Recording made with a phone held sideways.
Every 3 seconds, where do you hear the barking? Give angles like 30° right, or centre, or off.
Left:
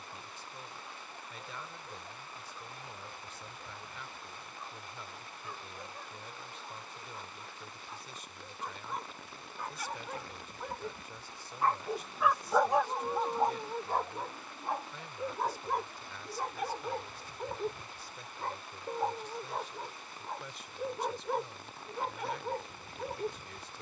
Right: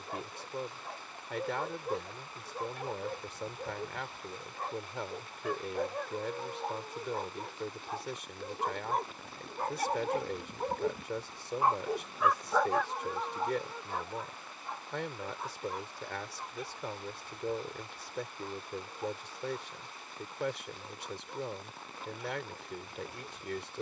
70° right, 70° right, 70° right, 40° right, 30° left, 70° left, 80° left, 80° left.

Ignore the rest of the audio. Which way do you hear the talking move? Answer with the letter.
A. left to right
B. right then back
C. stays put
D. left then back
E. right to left
C.